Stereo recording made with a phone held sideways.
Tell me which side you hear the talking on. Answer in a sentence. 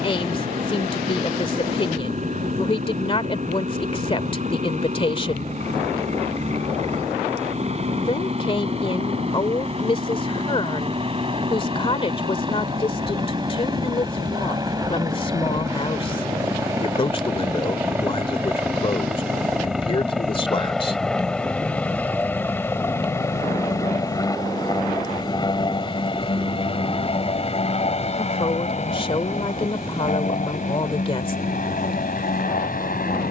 In this clip you hear the talking on the left.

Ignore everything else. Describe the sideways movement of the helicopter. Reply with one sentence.
You can hear the helicopter travel towards the left.